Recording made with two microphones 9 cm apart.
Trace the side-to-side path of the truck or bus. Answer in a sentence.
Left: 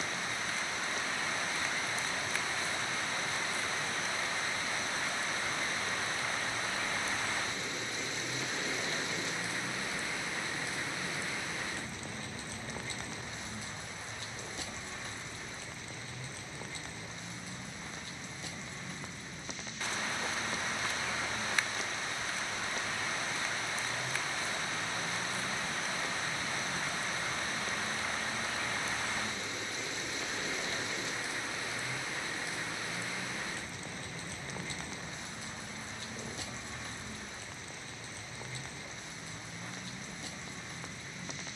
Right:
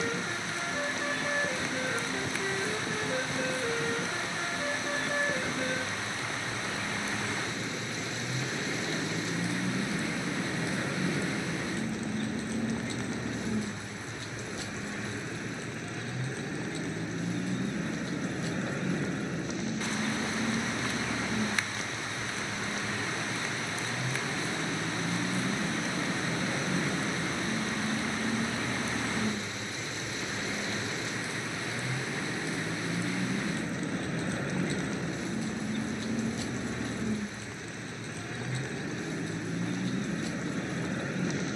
You can hear the truck or bus stay in one place.